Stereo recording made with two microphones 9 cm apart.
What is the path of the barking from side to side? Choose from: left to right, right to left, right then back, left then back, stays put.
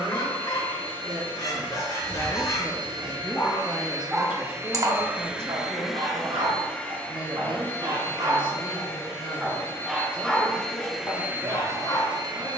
right then back.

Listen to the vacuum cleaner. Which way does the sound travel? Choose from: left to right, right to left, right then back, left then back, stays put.
left then back.